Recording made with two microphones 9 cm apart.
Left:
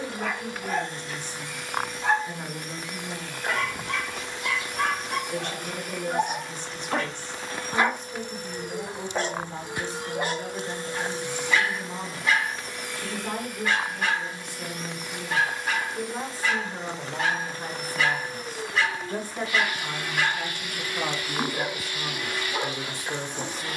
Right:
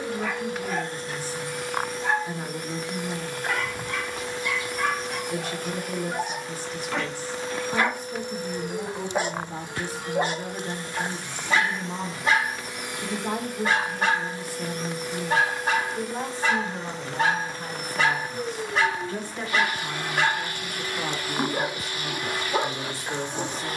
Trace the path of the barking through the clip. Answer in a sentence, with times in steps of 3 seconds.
You can hear the barking on the left from 0 s and on the right from 9 s.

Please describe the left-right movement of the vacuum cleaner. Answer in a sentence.
You can hear the vacuum cleaner move from right to left and back again.